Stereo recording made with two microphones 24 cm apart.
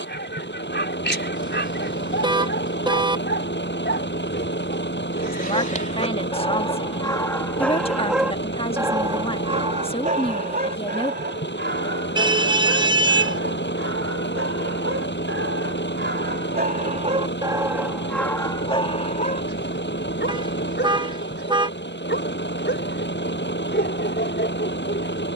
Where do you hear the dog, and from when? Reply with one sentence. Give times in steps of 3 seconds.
You can hear the dog on the left from 0 s, in the centre from 6 s, on the right from 9 s and on the left from 18 s.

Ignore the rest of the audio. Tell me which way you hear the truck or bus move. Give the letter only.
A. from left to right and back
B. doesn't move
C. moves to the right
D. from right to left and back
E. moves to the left
B.